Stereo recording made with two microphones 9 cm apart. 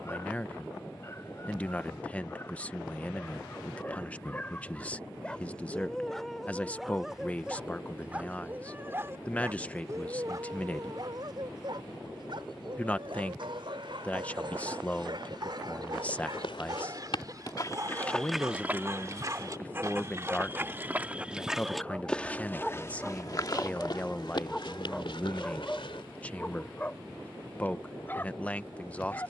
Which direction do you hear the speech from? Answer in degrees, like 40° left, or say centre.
10° left.